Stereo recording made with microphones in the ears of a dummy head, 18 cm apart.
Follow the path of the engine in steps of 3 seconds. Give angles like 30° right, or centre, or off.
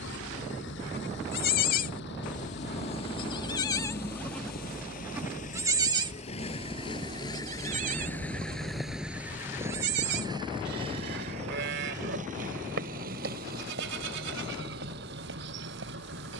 60° left, 50° left, 20° left, 20° right, 50° right, 60° right.